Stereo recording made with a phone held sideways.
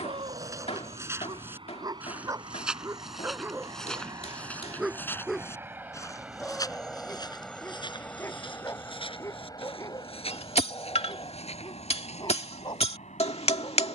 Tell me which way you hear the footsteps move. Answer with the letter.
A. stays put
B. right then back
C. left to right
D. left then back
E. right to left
E.